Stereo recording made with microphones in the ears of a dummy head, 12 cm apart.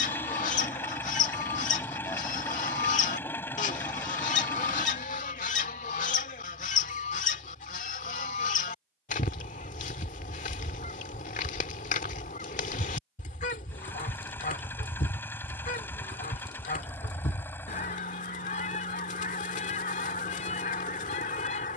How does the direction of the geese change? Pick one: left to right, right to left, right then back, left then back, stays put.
stays put.